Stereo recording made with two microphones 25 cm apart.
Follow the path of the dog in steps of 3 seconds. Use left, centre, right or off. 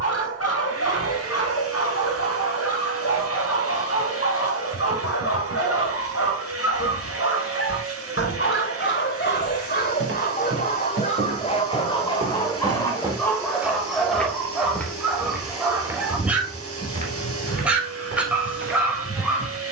left, left, left, left, centre, centre, centre.